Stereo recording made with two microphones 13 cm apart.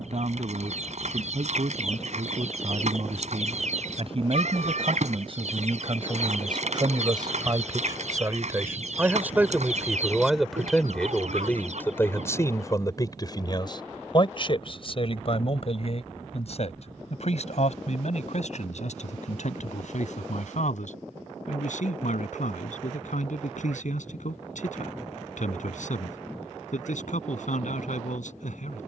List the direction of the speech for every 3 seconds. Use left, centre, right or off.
right, right, right, centre, left, left, left, left, left, left.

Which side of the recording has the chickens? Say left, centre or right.
right.